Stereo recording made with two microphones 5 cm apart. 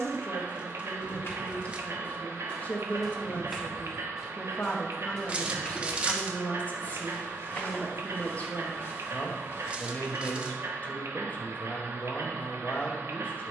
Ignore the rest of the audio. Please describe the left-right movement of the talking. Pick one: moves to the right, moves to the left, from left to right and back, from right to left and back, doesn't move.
doesn't move.